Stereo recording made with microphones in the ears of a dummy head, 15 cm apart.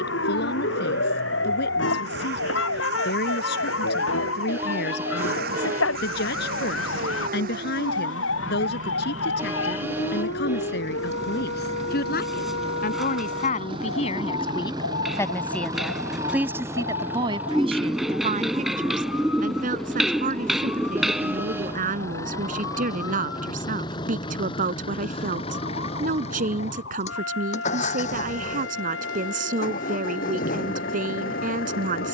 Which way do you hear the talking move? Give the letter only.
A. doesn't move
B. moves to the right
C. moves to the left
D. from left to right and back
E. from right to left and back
B.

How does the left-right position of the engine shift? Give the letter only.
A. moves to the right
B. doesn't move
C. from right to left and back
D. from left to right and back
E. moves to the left
E.